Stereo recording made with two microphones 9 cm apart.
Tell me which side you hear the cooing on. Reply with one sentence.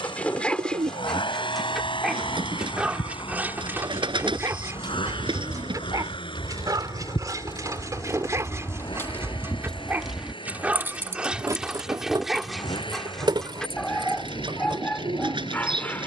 In this clip you hear the cooing on the right.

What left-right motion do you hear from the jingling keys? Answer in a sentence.
In this clip you hear the jingling keys move from left to right.